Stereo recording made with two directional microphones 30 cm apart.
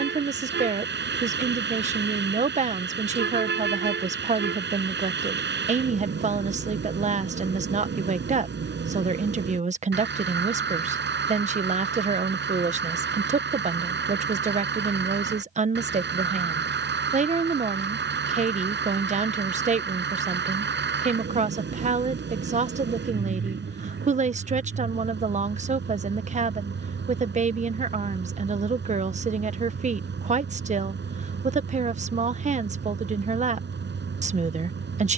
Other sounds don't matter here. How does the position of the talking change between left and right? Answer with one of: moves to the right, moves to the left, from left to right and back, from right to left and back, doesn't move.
doesn't move.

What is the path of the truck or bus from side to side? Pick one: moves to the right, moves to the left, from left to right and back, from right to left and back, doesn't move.
doesn't move.